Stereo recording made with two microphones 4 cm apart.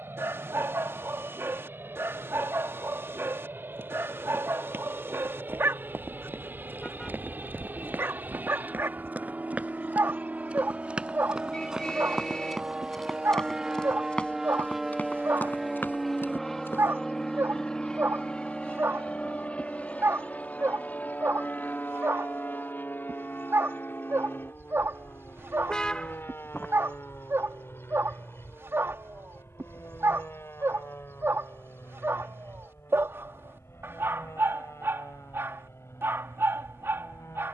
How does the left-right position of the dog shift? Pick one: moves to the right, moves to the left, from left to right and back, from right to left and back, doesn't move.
doesn't move.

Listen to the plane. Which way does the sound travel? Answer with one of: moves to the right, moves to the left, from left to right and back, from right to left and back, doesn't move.
moves to the left.